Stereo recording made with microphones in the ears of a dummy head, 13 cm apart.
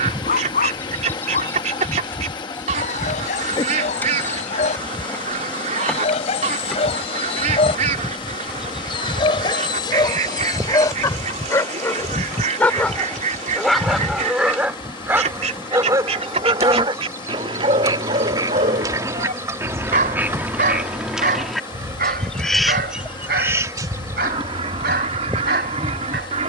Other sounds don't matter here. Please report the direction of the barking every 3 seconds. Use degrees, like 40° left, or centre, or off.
60° left, 50° left, 40° left, 30° left, centre, 30° right, 50° right, 70° right, 70° right.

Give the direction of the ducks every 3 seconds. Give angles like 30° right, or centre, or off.
50° right, 50° right, 50° right, 50° right, 50° right, 50° right, 20° right, 10° right, 50° right.